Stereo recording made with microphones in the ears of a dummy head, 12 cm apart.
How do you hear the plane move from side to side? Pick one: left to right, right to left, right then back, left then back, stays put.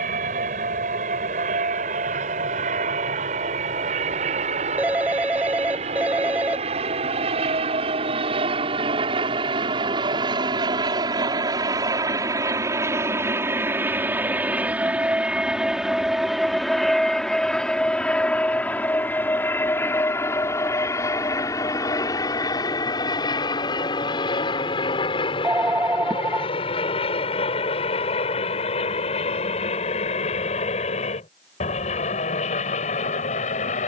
right to left.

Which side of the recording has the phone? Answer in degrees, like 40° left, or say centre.
10° right.